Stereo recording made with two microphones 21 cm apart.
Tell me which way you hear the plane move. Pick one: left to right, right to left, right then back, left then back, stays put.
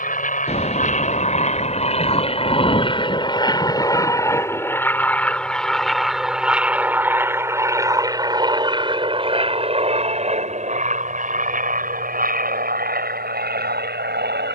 left to right.